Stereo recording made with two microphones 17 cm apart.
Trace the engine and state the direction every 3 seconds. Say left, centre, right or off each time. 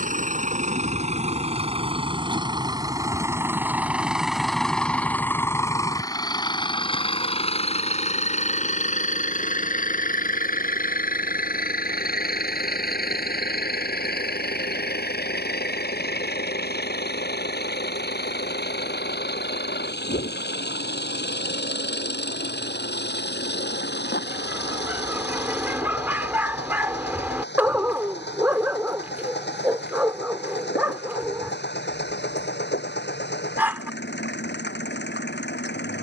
right, centre, left, left, left, left, left, left, left, left, left, left.